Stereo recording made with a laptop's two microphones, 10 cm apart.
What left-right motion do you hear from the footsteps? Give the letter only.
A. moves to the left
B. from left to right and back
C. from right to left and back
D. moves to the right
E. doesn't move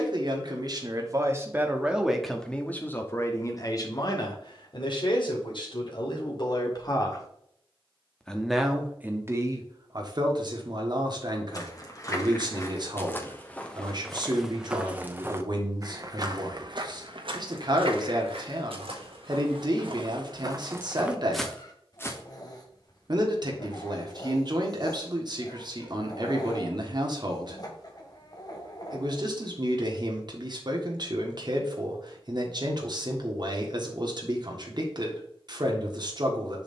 B.